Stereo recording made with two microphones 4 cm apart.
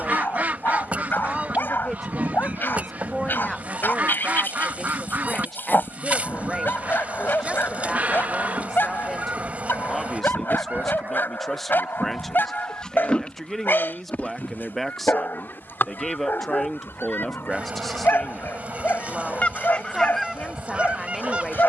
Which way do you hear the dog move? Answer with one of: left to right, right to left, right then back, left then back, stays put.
stays put.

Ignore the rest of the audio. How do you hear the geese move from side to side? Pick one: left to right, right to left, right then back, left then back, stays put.
left then back.